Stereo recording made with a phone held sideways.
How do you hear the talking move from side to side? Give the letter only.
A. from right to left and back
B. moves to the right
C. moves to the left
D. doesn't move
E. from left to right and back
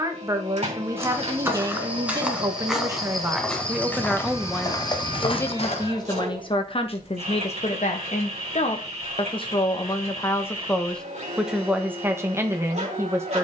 A.